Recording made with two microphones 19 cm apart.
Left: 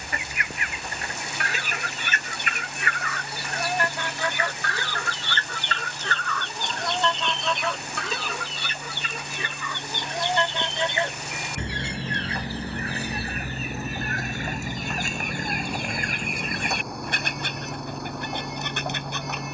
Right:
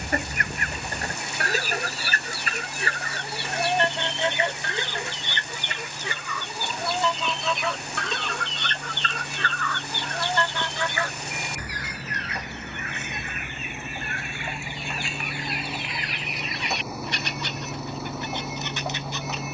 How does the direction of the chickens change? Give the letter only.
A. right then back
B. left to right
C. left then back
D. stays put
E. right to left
E.